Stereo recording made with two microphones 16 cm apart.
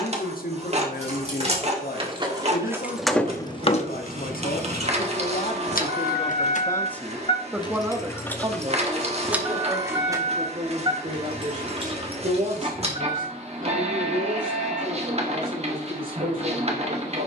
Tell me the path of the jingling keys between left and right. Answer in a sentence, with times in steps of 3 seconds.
You can hear the jingling keys on the right from 0 s, on the left from 3 s, on the right from 9 s and not at all from 15 s.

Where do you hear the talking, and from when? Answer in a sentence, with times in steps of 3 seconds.
You can hear the talking on the left from 0 s, in the centre from 6 s and on the right from 9 s.